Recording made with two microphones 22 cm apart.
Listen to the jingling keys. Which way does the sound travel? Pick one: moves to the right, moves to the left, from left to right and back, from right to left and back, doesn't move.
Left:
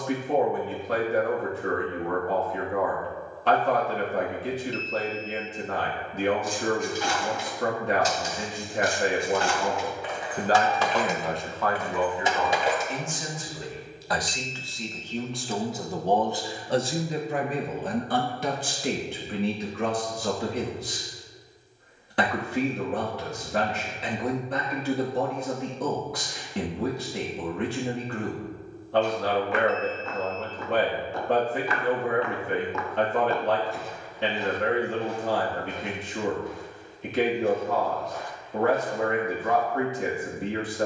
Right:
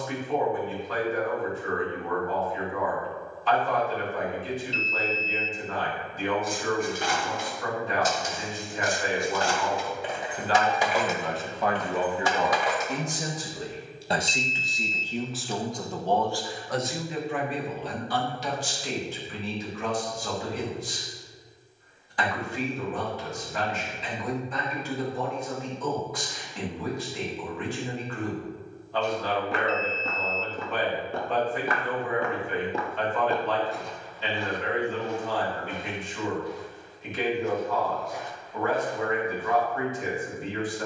moves to the left.